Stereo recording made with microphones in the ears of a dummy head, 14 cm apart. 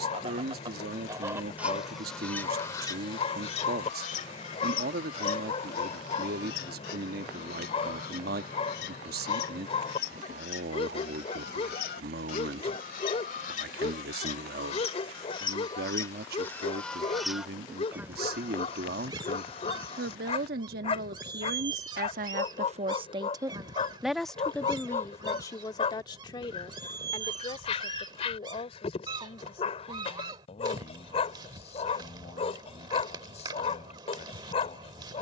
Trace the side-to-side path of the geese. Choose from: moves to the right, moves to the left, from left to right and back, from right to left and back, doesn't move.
from right to left and back.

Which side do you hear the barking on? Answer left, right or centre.
left.